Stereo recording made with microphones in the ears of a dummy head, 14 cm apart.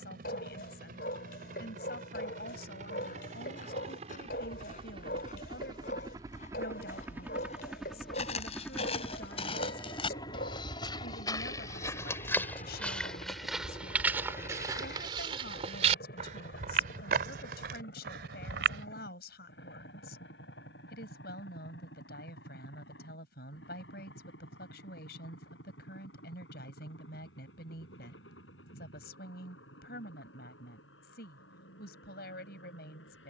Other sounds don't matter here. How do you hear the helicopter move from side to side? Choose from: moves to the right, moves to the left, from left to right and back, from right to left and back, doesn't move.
moves to the left.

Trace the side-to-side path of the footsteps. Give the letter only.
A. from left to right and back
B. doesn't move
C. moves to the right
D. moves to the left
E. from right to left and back
C.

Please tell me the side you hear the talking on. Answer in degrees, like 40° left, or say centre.
70° left.